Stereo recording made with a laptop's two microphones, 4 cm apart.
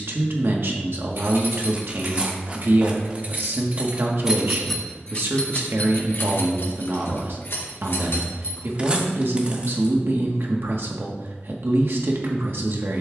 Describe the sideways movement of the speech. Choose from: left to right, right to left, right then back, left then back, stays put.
stays put.